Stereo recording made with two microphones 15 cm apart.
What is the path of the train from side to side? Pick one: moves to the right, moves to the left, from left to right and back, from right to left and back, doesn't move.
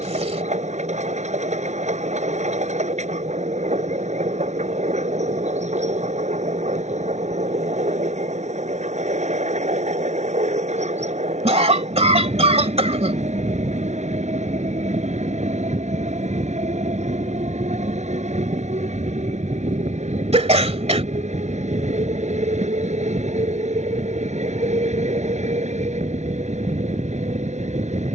doesn't move.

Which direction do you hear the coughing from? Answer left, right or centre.
right.